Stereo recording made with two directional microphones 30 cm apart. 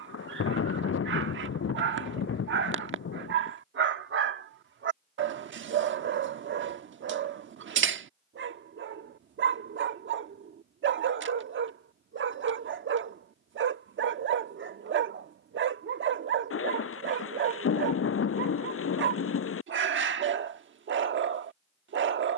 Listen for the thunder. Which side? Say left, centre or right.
left.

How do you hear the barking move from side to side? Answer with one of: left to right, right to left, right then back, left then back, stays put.
stays put.